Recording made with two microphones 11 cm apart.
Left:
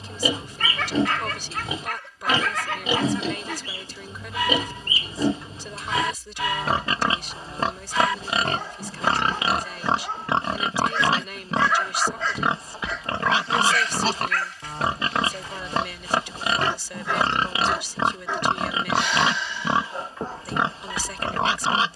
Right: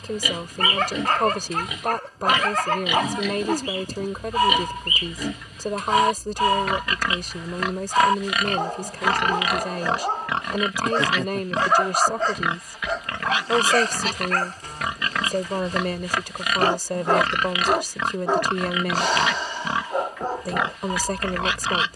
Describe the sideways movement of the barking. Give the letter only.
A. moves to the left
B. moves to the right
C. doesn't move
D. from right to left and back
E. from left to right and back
C.